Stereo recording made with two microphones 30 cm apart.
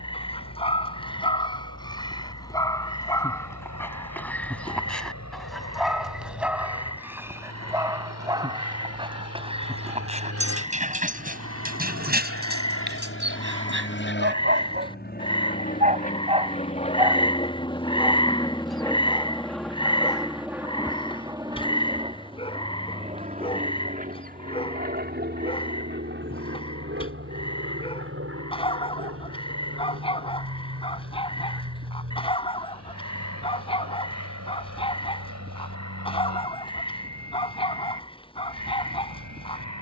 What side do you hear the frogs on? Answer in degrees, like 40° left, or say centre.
20° left.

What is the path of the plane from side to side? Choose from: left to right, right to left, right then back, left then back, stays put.
left to right.